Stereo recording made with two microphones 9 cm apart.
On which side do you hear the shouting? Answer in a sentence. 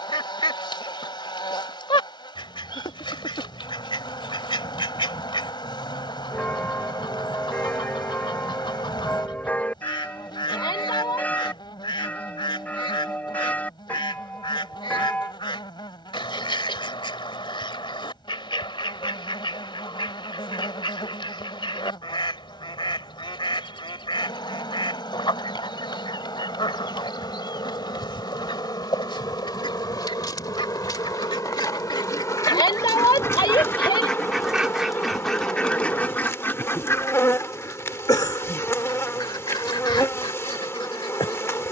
You can hear the shouting on the left.